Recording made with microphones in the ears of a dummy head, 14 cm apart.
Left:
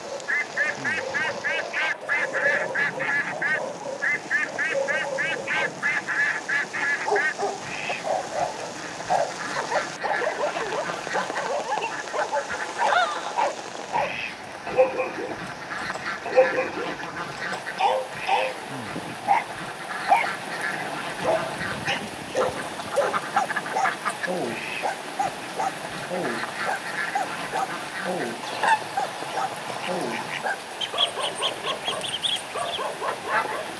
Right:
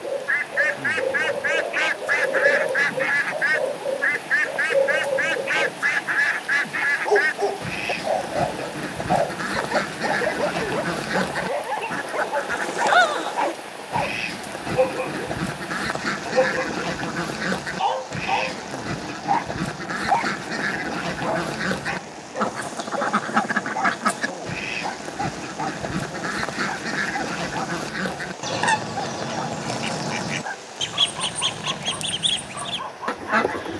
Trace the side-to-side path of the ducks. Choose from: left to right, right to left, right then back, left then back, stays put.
stays put.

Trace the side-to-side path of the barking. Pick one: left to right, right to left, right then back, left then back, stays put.
right to left.